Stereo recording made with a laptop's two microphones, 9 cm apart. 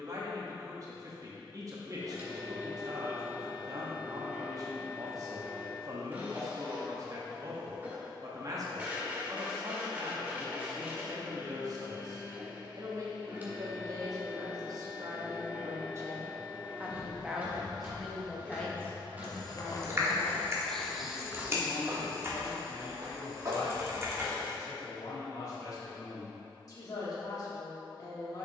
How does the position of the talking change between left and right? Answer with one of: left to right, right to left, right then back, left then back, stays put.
right to left.